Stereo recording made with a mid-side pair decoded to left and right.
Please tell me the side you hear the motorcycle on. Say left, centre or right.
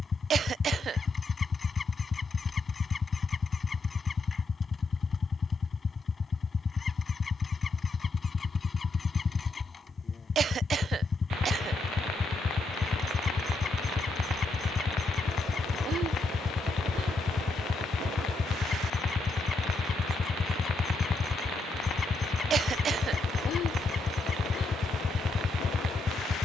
left.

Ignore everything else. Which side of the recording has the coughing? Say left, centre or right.
right.